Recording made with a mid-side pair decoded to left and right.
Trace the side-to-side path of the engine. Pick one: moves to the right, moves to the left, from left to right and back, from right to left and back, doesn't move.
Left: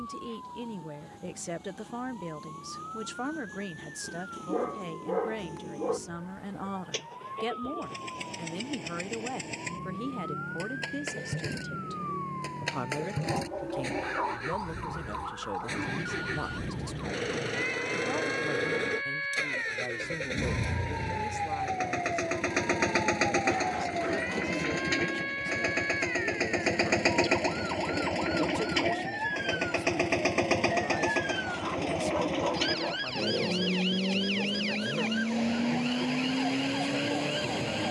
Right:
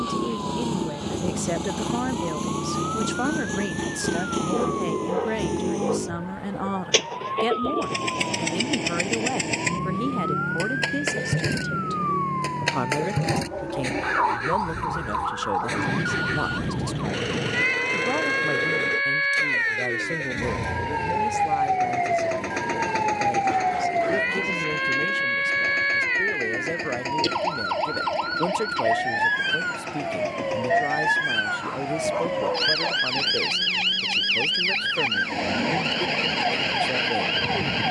moves to the left.